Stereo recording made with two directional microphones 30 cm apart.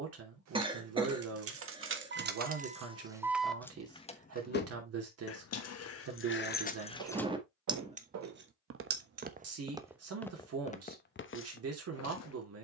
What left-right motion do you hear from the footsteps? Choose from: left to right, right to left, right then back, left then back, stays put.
right to left.